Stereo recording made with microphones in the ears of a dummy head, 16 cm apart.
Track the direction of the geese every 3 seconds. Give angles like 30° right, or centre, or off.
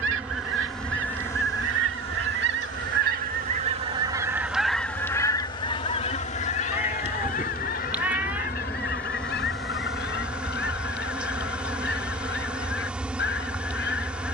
70° right, 10° right, 50° left, 60° left, 60° left.